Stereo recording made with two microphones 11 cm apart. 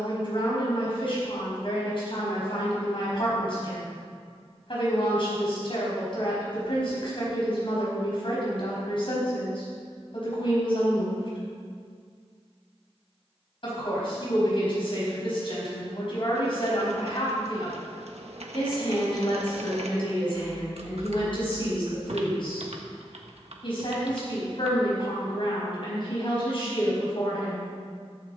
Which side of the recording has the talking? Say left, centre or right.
left.